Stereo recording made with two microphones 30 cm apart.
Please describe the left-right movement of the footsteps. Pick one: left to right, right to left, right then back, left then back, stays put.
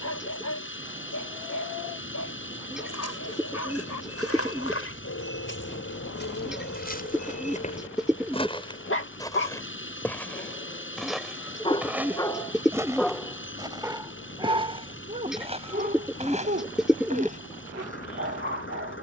left to right.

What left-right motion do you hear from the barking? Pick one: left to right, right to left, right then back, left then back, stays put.
left to right.